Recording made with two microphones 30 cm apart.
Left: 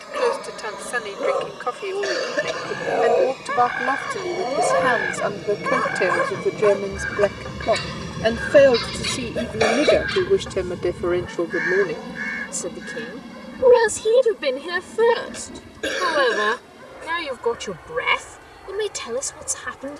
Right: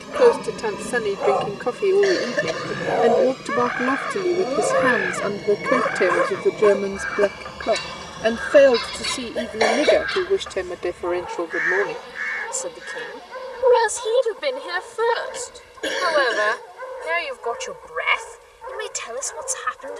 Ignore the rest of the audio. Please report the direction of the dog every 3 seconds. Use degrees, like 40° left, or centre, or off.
20° left, 20° right, 50° right, 70° right, 80° right, 80° right, 80° right.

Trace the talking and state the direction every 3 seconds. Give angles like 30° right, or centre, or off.
50° right, 30° right, 10° right, 10° left, 30° left, 40° left, 50° left.